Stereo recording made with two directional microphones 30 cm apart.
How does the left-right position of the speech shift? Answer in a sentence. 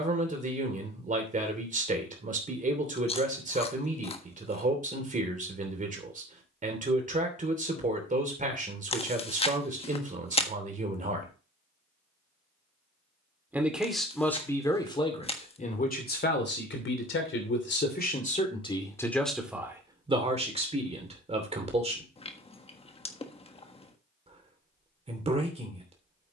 You can hear the speech go left and come back.